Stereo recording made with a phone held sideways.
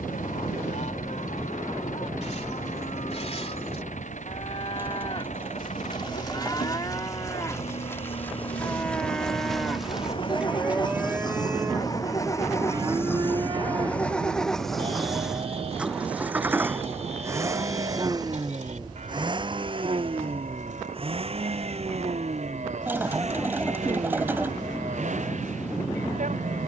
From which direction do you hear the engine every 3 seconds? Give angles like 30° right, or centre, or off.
60° left, 60° left, 50° left, 30° left, 10° left, 10° right, 30° right, 50° right, 60° right.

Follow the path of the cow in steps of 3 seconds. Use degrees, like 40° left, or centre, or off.
50° left, 40° left, 20° left, 10° right, 30° right, 50° right, 60° right, 60° right, 60° right.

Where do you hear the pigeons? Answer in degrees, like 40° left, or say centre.
20° right.